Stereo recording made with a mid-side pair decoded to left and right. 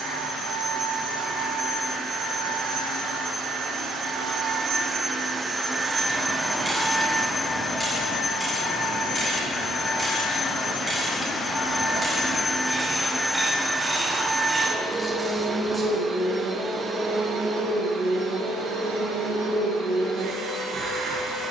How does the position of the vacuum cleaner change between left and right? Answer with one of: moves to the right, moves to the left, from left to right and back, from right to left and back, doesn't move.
from right to left and back.